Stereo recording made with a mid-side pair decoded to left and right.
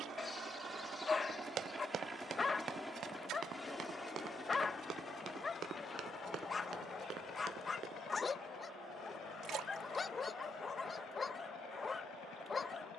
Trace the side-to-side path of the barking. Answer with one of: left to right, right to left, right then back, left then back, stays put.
stays put.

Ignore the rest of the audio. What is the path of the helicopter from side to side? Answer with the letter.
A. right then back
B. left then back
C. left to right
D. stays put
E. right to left
E.